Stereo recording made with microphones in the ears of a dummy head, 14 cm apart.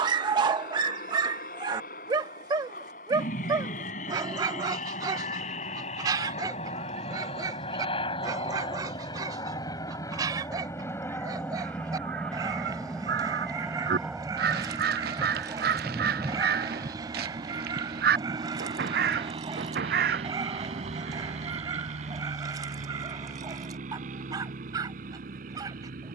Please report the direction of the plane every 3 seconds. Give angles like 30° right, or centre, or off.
60° left, 50° left, 40° left, 20° left, centre, 20° right, 30° right, 40° right, 50° right.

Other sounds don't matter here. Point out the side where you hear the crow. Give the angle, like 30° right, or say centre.
70° right.